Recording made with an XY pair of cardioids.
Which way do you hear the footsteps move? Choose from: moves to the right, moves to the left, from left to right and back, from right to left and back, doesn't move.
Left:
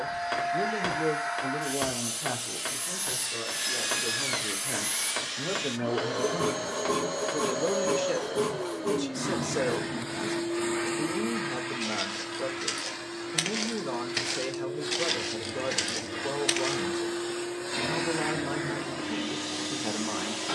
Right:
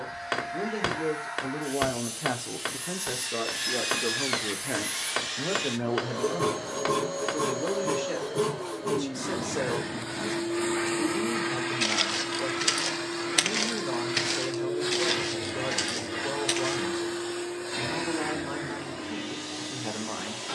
moves to the left.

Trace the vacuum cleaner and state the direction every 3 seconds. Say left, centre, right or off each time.
left, left, left, centre, right, centre, left.